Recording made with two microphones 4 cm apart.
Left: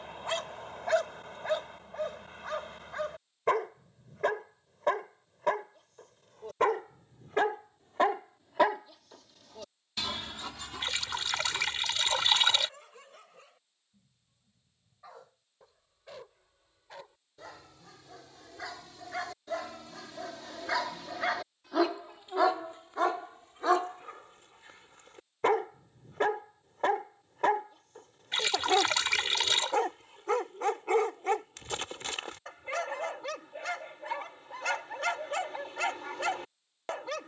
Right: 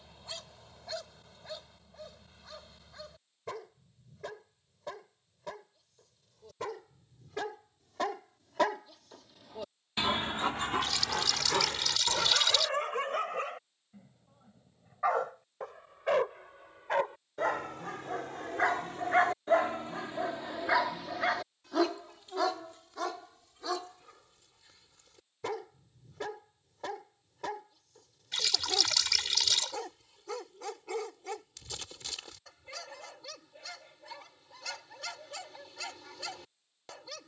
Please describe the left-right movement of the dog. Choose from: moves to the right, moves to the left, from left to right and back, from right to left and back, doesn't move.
from left to right and back.